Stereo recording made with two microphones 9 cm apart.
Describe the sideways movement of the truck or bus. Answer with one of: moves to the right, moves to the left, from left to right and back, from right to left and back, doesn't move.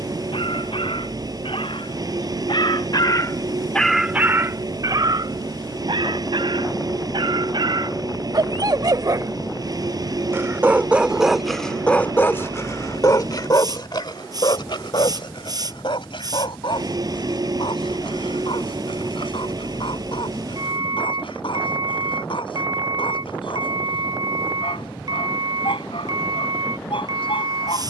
doesn't move.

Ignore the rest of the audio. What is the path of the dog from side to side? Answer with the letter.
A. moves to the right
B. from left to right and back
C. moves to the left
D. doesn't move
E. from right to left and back
B.